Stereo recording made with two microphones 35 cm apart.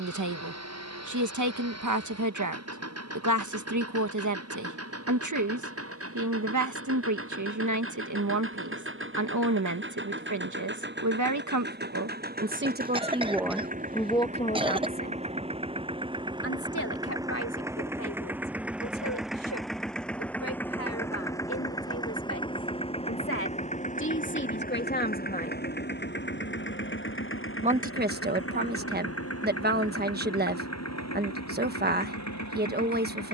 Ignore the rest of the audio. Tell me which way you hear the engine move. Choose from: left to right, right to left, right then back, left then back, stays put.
right to left.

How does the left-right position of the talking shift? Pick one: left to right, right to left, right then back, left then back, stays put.
left then back.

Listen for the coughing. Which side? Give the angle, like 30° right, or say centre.
10° right.